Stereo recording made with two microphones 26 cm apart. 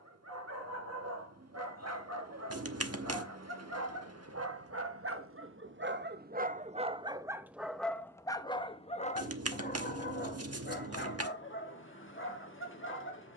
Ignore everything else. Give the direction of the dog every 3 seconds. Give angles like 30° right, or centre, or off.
70° right, 60° right, 10° right, 40° left, 50° left.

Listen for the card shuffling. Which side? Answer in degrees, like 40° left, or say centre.
70° right.